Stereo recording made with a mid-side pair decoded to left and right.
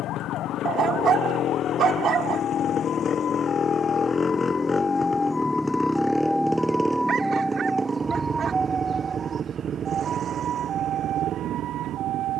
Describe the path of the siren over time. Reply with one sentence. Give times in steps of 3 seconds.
You can hear the siren on the left from 0 s, in the centre from 6 s and on the right from 9 s.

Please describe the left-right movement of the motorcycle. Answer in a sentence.
In this clip you hear the motorcycle move to the right.